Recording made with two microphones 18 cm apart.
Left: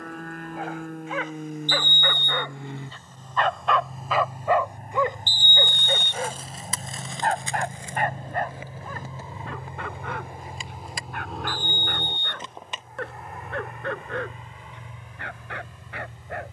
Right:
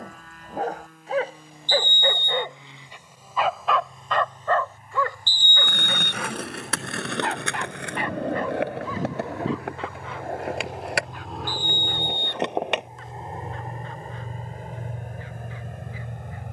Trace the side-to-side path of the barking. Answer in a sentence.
In this clip you hear the barking travel towards the left.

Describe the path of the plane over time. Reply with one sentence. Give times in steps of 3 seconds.
You can hear the plane on the left from 0 s, in the centre from 9 s and on the right from 12 s.